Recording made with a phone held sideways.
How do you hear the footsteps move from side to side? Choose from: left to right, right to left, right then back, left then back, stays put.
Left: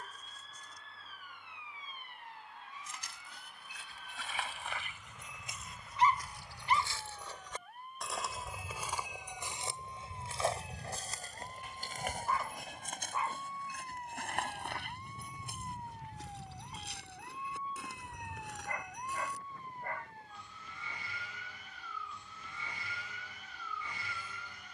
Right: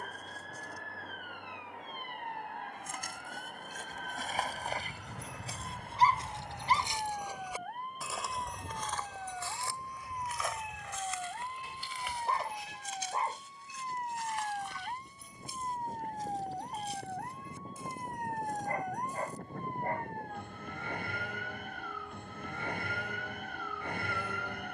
right to left.